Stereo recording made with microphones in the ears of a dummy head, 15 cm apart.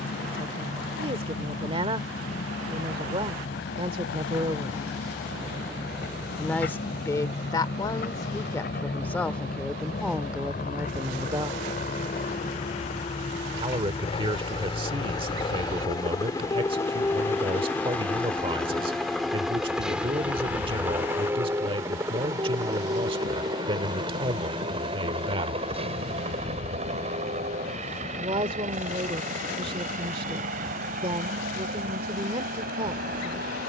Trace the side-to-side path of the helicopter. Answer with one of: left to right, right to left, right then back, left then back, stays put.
left to right.